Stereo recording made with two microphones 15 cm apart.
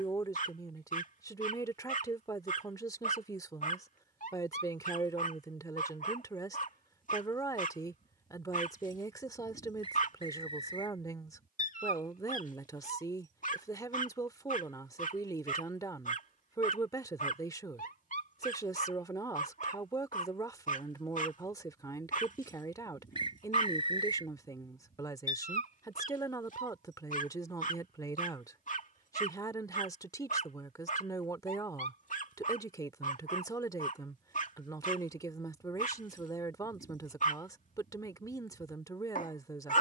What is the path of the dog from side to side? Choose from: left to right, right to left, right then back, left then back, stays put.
stays put.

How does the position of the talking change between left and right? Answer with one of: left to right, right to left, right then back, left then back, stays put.
stays put.